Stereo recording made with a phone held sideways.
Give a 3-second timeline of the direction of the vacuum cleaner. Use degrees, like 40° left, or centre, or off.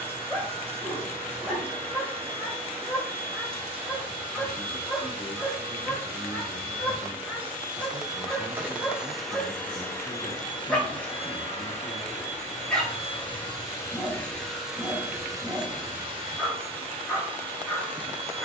40° right, 40° right, 30° right, 20° left, 30° left, 30° right.